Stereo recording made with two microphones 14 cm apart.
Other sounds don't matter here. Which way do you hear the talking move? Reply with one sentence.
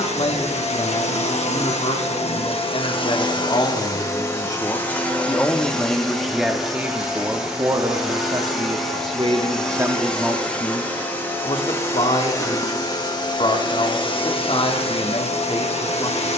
In this clip you hear the talking go right and come back.